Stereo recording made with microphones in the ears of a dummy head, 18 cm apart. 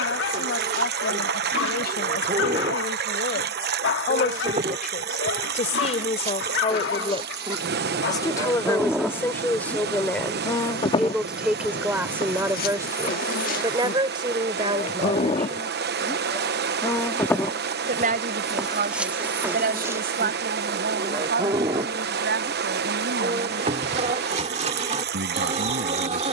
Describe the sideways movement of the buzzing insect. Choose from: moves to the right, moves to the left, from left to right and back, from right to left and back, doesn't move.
from right to left and back.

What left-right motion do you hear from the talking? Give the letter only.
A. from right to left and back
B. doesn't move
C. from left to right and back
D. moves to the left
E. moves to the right
E.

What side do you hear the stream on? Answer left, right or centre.
right.